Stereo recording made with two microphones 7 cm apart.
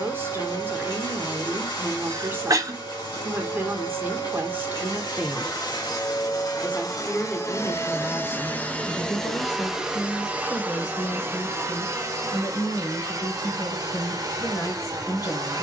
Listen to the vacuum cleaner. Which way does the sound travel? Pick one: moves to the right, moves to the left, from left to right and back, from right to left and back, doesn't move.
moves to the right.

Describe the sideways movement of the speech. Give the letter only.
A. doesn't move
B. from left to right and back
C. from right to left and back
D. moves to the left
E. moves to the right
D.